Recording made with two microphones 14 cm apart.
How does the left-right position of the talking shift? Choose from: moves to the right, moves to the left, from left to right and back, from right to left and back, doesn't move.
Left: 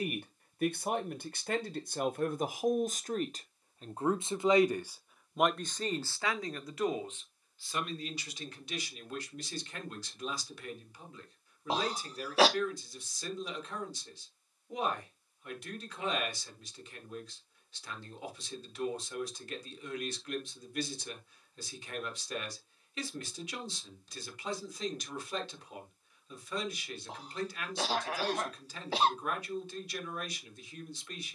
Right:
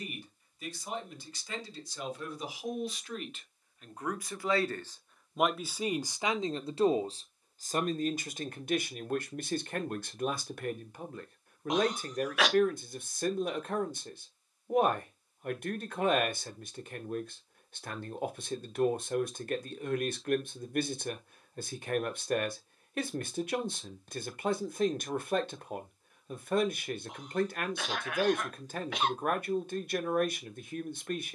moves to the right.